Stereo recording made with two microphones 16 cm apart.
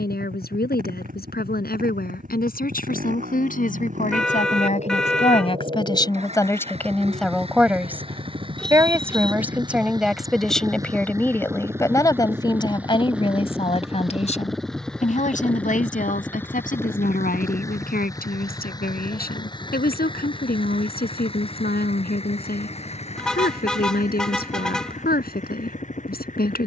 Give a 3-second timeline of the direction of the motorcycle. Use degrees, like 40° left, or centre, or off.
50° right, 50° right, 40° right, 20° right, centre, 10° left, 30° left, 40° left, 50° left.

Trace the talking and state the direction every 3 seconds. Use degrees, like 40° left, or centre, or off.
70° left, 50° left, centre, centre, 30° left, 60° left, 70° left, 70° left, 70° left.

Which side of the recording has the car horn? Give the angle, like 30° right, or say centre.
centre.